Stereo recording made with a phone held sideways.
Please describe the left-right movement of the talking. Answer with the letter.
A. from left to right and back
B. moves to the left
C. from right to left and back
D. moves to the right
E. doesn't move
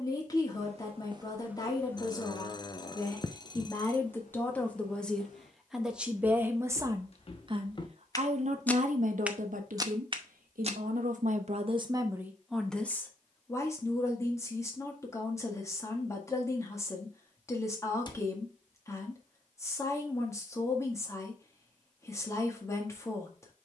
A.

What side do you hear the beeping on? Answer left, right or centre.
left.